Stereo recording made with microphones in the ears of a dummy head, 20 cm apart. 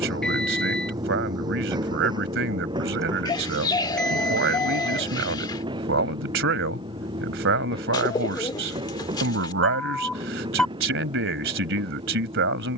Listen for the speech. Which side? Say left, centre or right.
right.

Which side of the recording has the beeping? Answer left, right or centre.
centre.